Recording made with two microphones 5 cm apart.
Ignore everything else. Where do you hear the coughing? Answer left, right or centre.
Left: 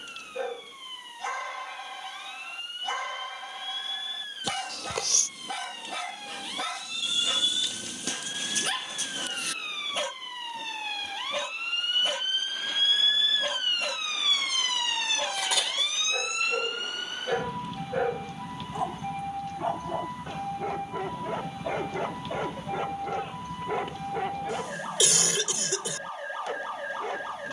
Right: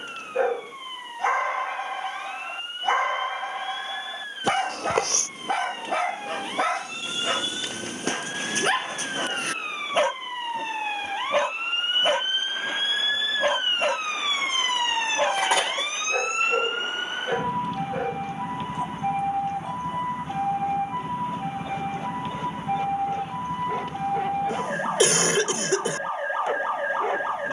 right.